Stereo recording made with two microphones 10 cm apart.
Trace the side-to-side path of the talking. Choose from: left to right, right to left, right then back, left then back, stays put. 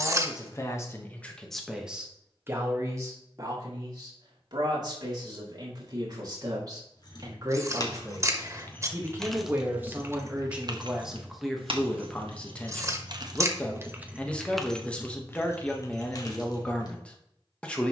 right then back.